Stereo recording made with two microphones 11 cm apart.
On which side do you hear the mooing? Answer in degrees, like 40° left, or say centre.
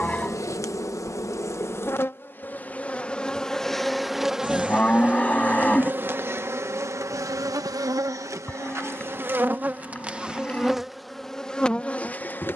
10° left.